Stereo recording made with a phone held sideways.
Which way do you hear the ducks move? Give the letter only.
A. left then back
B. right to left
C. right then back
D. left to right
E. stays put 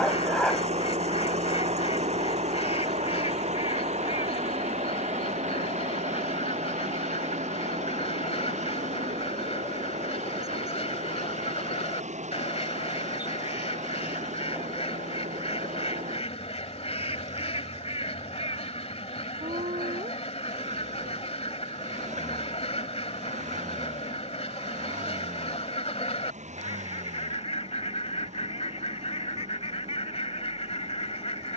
E.